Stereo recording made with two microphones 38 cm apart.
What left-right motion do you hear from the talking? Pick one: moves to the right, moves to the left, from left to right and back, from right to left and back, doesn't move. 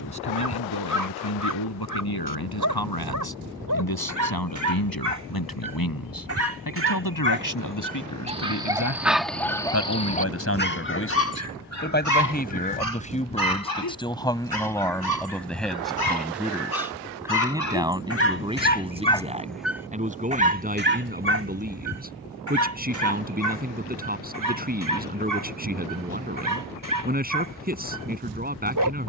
moves to the right.